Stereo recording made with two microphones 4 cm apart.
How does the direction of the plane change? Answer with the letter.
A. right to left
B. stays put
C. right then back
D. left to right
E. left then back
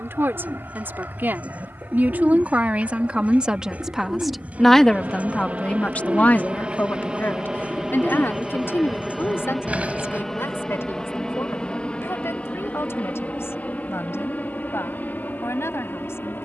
A.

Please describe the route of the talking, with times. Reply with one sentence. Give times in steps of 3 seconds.
In this clip you hear the talking on the right from 0 s, in the centre from 3 s and on the left from 6 s.